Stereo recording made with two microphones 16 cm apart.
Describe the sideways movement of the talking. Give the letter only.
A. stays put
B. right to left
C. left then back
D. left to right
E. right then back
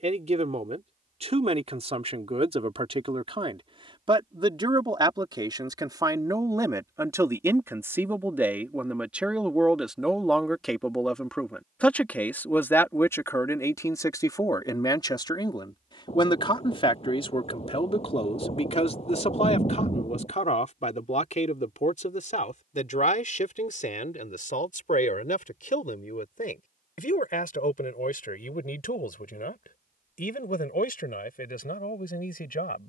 B.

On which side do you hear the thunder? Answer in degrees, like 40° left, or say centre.
40° left.